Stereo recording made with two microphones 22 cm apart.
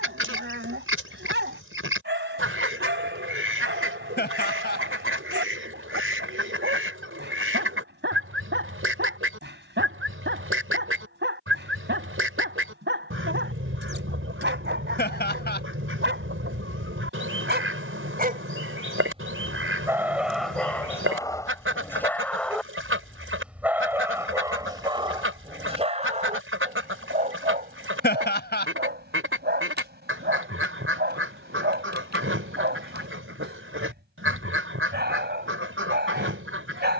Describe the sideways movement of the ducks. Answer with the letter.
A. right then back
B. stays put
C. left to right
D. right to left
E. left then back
B.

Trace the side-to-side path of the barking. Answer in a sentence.
You can hear the barking go left and come back.